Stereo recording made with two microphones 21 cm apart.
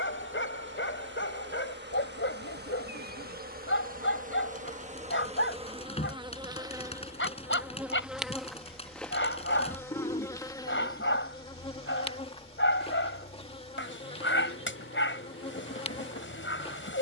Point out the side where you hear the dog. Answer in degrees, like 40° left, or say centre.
70° left.